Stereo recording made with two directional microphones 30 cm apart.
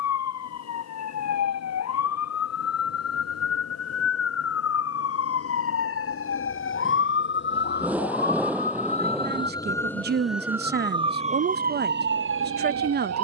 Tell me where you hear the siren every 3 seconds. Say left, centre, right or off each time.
left, left, left, centre, right.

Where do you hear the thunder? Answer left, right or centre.
centre.